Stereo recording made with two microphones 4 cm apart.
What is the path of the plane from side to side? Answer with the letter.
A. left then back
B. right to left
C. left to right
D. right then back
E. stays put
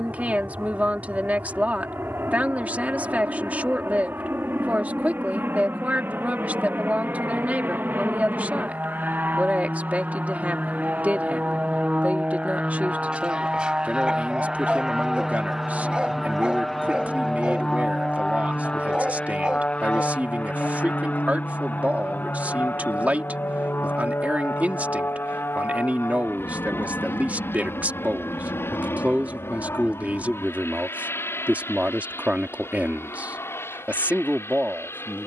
B.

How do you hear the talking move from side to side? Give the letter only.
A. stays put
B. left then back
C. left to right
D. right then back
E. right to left
A.